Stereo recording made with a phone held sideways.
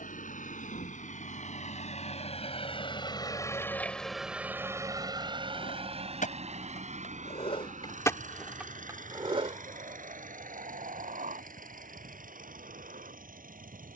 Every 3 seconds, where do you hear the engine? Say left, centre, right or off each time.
left, centre, right, right, right.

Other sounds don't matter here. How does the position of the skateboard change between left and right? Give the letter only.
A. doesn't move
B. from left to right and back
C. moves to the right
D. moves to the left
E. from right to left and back
C.